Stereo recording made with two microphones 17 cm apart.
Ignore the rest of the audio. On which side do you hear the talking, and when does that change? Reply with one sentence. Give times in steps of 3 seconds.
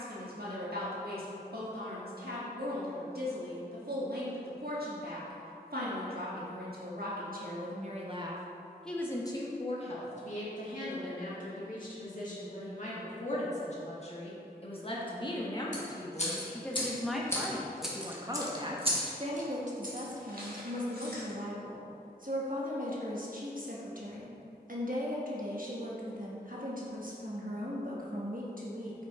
In this clip you hear the talking on the right from 0 s, on the left from 9 s, in the centre from 15 s and on the right from 18 s.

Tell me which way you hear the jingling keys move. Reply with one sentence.
In this clip you hear the jingling keys move to the right.